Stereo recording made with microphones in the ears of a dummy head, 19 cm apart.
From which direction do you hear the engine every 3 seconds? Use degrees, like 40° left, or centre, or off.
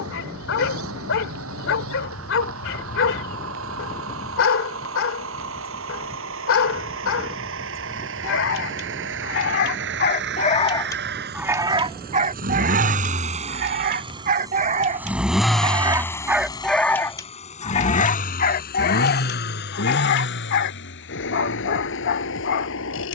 80° right, 70° right, 70° right, 60° right, 30° right, 20° left, 50° left, 70° left.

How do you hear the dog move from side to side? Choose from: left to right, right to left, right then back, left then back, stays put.
right then back.